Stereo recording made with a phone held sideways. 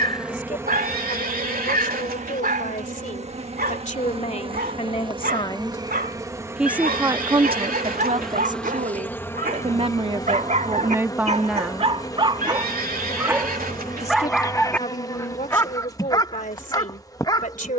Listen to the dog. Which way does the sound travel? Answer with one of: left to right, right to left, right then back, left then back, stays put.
right to left.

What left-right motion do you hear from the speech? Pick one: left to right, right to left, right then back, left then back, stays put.
right then back.